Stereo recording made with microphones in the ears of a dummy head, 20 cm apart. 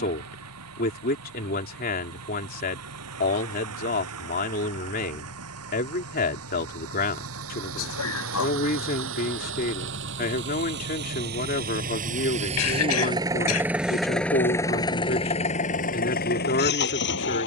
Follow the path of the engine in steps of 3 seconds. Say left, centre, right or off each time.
right, right, right, right, centre, left.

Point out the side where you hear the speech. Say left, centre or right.
left.